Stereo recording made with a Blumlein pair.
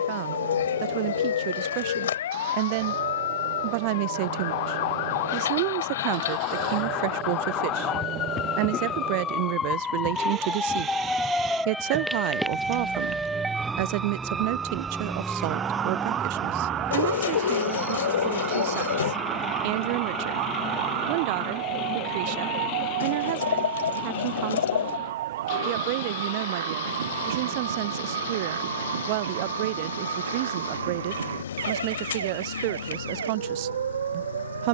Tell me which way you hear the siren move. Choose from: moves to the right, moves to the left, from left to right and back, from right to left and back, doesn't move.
moves to the right.